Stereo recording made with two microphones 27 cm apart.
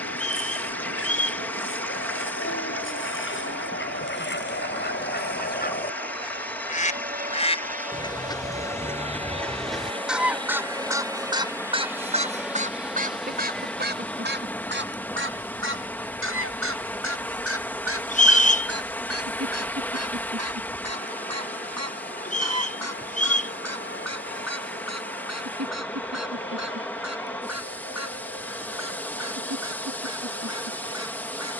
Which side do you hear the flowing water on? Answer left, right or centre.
centre.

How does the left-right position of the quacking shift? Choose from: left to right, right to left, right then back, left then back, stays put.
left to right.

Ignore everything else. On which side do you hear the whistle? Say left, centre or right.
left.